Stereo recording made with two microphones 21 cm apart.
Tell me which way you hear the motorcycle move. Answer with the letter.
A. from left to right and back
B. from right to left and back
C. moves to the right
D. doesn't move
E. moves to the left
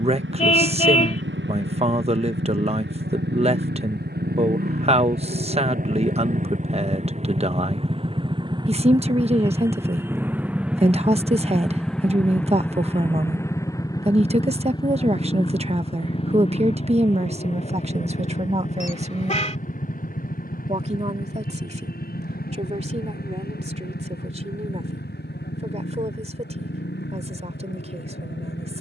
E.